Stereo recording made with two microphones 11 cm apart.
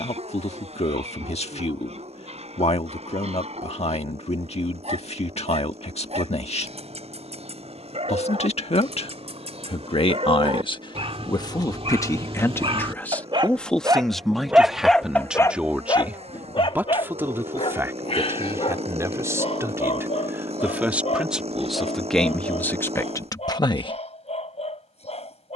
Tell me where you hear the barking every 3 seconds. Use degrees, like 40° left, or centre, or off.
80° right, 80° right, 80° right, 70° right, 40° right, 50° left, 70° left, 80° left, 80° left.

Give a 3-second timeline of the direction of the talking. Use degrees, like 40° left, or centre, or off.
80° left, 80° left, 80° left, 50° left, 10° left, 20° right, 20° right, 10° left, off.